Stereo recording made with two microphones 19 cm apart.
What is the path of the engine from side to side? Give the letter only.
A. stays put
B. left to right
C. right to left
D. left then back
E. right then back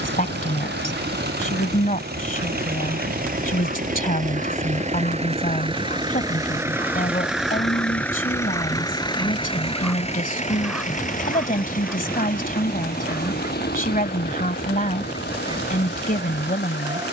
C.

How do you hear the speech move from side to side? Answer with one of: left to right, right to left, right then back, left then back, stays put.
stays put.